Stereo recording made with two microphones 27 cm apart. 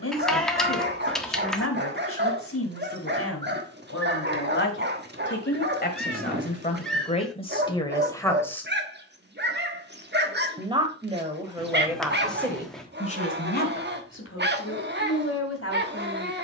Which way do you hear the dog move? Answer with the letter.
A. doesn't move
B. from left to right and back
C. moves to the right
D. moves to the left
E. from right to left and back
A.